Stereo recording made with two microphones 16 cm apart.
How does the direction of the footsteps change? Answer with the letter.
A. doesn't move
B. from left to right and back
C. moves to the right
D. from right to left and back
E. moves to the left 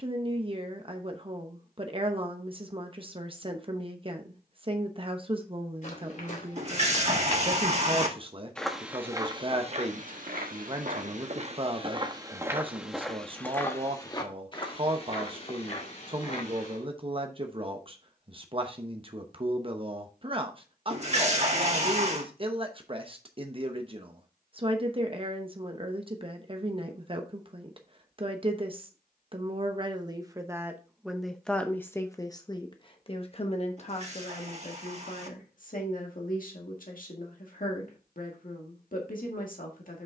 B.